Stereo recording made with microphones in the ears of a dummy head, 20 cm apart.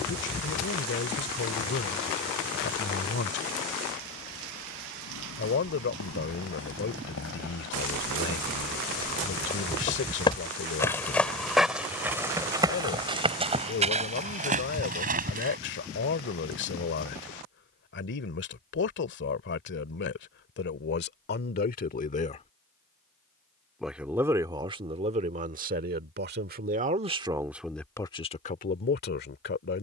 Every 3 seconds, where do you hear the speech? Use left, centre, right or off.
left, left, left, left, left, left, left, left, right, left.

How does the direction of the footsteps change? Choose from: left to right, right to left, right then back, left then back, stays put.
left to right.